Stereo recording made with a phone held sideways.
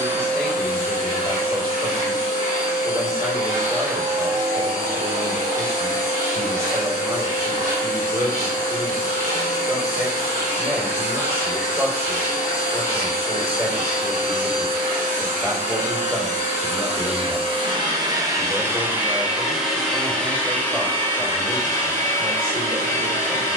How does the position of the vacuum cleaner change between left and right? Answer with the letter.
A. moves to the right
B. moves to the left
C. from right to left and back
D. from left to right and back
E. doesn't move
B.